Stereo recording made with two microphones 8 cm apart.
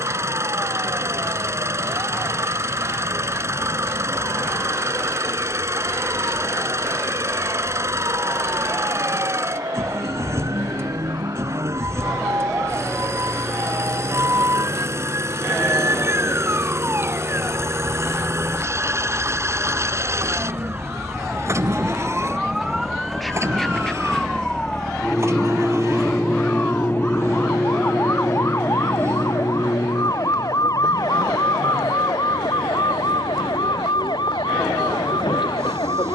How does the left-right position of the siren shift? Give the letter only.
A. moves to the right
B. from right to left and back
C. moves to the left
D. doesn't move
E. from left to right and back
C.